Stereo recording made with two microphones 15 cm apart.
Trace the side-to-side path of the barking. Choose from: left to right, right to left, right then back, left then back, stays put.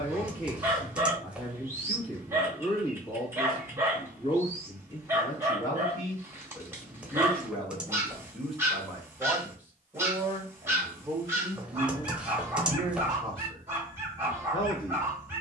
stays put.